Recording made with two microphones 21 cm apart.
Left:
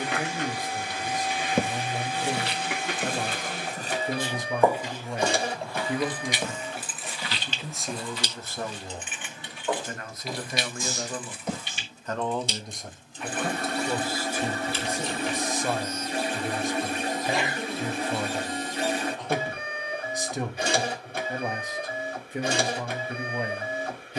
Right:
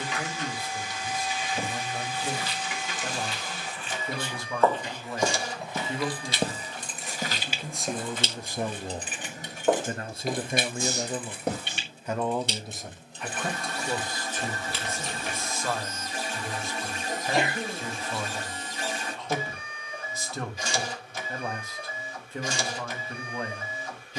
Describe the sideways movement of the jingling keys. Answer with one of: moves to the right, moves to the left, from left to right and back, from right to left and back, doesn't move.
moves to the right.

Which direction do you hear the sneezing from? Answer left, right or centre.
right.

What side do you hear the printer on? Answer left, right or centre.
left.